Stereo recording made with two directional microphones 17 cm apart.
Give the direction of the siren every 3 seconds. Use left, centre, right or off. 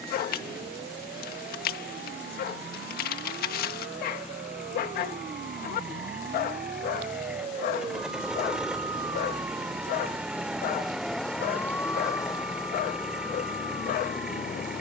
right, right, right, centre, left.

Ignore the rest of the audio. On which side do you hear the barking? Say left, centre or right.
left.